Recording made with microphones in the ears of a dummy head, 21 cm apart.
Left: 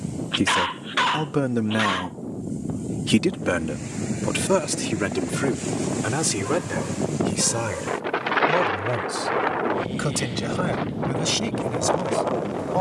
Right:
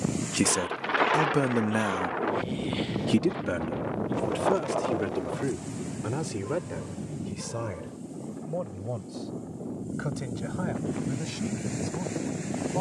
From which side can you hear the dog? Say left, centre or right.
left.